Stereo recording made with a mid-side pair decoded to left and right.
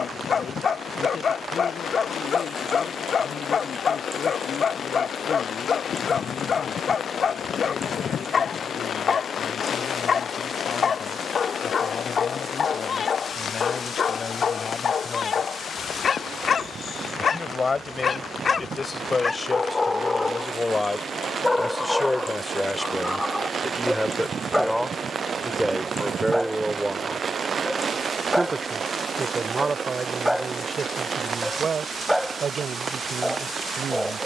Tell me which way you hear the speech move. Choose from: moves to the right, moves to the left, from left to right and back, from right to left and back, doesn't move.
moves to the right.